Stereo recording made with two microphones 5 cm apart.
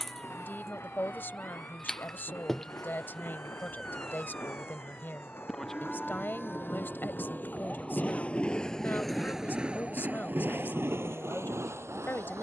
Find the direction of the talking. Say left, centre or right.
left.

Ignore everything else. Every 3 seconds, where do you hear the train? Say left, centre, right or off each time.
left, left, left, right.